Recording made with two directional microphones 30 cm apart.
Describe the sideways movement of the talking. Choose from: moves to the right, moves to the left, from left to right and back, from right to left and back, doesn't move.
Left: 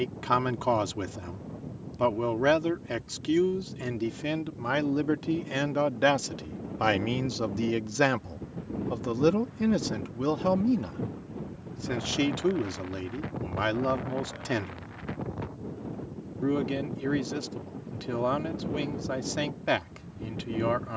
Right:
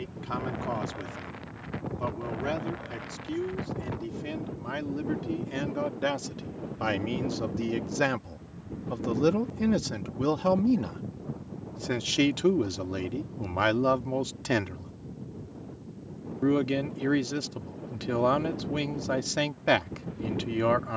moves to the right.